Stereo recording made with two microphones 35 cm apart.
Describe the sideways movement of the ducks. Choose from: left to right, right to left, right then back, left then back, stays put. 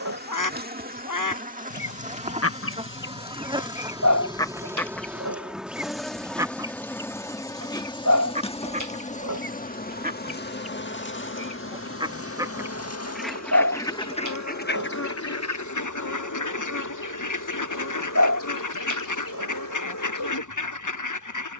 right then back.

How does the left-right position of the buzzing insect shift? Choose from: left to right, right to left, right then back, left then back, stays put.
right to left.